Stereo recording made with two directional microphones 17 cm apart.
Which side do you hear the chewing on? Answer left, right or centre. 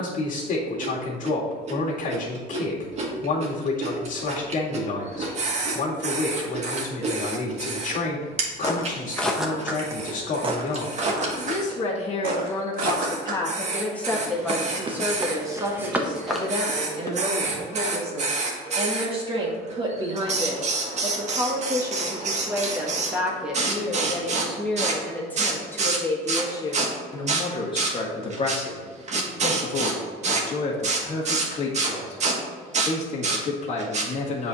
right.